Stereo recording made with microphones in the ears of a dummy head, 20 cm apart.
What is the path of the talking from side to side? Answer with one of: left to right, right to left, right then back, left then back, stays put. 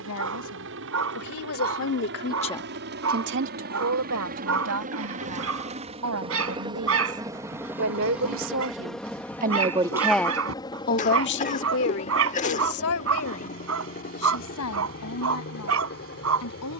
right then back.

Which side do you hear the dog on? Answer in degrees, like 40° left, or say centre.
70° right.